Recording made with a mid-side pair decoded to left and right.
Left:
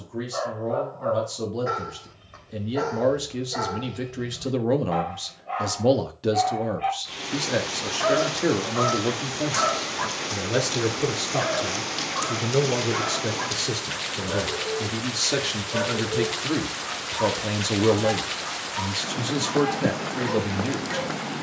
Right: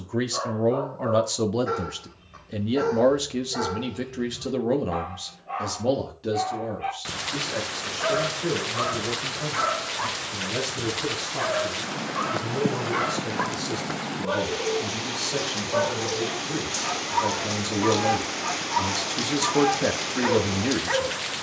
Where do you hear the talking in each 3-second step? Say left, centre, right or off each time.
right, centre, left, left, left, left, centre.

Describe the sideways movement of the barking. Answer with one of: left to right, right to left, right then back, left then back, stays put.
left to right.